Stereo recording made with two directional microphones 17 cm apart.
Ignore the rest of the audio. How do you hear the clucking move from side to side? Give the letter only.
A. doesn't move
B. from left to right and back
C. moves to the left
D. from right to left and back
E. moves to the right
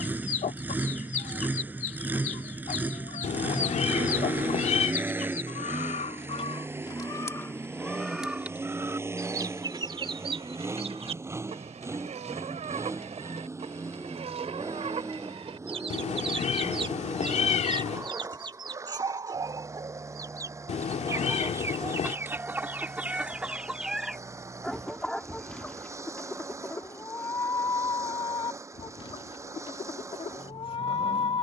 B.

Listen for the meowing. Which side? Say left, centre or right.
left.